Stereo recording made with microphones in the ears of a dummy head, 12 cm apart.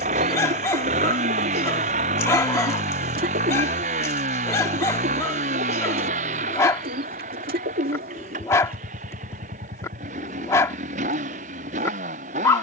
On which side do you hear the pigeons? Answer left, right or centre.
right.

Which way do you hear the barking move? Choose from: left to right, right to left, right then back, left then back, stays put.
stays put.